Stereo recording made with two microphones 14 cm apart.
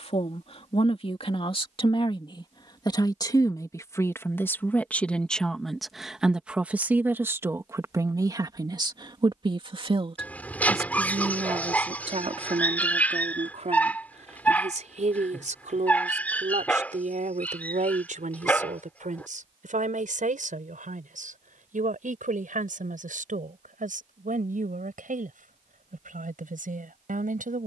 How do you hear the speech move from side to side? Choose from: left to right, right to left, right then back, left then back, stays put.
left to right.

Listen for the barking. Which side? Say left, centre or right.
centre.